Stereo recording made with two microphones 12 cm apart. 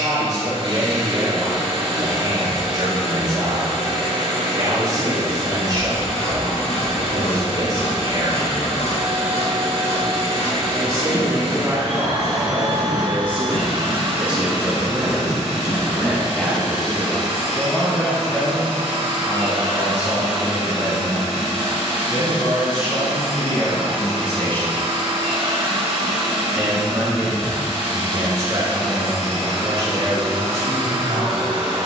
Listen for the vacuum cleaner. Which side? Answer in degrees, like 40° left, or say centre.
50° right.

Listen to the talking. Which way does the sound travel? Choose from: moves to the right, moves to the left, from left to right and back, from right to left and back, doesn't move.
from right to left and back.